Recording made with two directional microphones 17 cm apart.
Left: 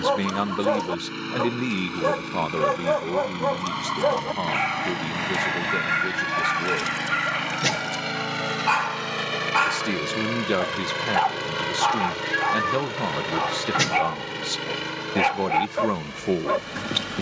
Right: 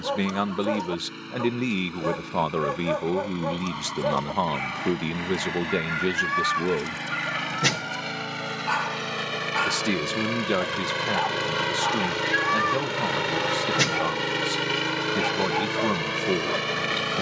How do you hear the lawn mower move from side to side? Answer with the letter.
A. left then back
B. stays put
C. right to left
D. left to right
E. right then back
D.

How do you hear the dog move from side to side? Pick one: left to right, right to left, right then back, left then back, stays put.
stays put.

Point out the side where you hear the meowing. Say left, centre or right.
centre.